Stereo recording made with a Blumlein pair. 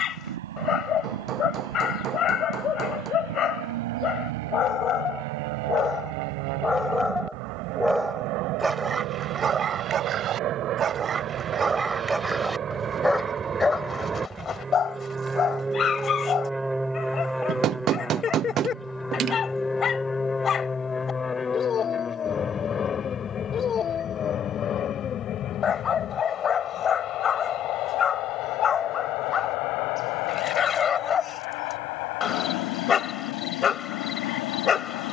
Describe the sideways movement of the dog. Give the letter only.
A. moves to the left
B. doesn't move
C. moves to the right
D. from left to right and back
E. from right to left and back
D.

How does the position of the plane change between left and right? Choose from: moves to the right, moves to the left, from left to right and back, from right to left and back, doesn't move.
moves to the left.